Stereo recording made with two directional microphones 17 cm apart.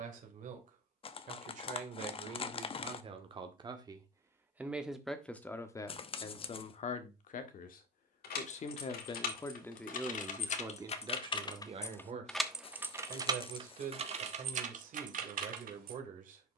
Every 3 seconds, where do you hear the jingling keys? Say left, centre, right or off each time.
off, off, left, left, right, right.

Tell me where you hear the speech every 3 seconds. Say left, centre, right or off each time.
right, centre, left, centre, right, right.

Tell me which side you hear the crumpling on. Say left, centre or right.
left.